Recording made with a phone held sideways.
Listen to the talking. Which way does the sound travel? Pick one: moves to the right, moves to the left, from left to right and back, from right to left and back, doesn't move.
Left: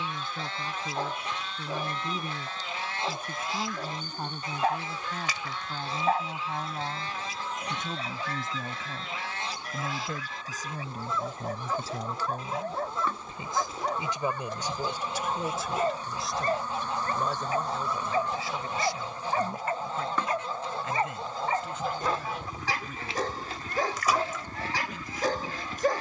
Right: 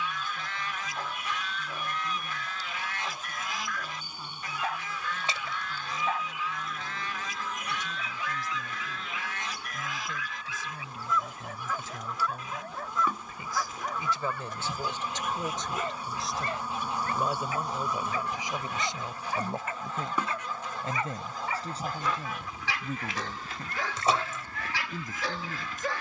moves to the right.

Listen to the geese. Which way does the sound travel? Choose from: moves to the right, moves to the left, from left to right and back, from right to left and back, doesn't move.
doesn't move.